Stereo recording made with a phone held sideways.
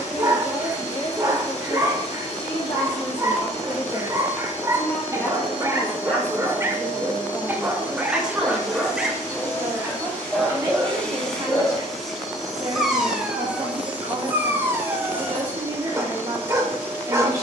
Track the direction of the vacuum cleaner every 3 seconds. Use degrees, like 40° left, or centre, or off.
60° left, 60° left, 40° left, 10° left, 10° right, 20° right.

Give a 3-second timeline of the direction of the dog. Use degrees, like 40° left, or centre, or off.
30° right, 30° right, 20° right, centre, 10° right, 20° right.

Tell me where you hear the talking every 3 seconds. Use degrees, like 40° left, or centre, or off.
50° left, 20° left, centre, 20° right, 30° right, 30° right.